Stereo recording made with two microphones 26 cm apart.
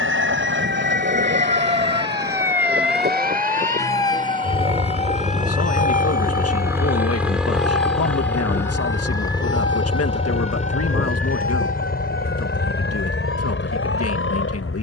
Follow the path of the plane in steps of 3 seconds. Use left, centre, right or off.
right, right, centre, left, left.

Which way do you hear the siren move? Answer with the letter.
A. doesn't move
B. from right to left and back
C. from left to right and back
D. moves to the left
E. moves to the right
D.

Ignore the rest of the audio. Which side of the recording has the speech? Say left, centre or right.
left.